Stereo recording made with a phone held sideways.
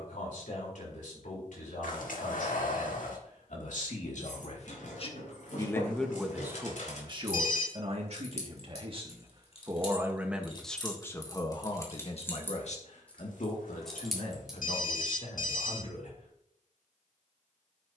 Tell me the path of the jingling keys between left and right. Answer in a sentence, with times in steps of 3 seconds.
You can hear the jingling keys not at all from 0 s, on the left from 3 s, in the centre from 12 s and not at all from 15 s.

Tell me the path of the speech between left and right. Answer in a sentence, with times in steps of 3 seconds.
In this clip you hear the speech on the left from 0 s, on the right from 6 s, in the centre from 9 s and on the left from 12 s.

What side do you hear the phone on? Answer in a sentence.
In this clip you hear the phone on the left.